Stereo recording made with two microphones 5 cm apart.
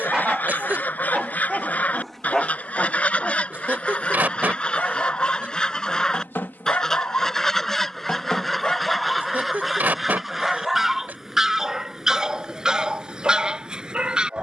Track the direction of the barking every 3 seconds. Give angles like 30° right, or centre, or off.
centre, 30° left, 30° left, centre, 20° right.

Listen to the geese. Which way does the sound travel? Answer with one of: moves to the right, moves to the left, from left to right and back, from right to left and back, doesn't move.
moves to the right.